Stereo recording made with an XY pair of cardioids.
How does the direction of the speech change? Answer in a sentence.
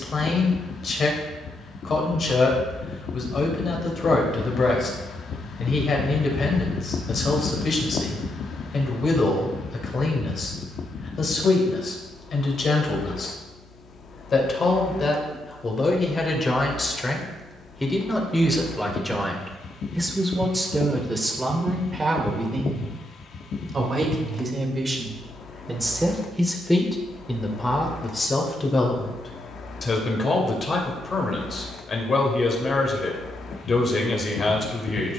You can hear the speech move from left to right and back again.